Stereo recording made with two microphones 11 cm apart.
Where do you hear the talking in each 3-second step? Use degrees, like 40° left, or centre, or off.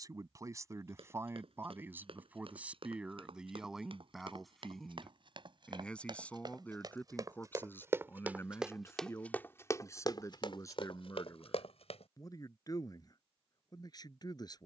20° right, centre, 20° left, 30° left, 40° left.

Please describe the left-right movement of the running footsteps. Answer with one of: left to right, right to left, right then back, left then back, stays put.
right to left.